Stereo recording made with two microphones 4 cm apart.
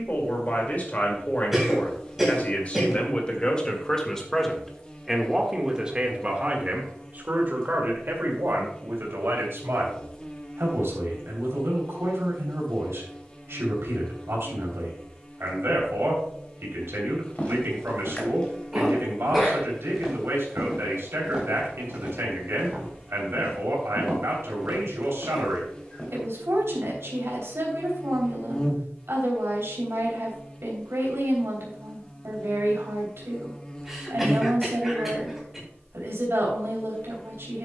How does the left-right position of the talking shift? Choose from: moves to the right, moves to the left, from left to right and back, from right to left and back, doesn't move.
moves to the right.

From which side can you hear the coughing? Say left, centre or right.
centre.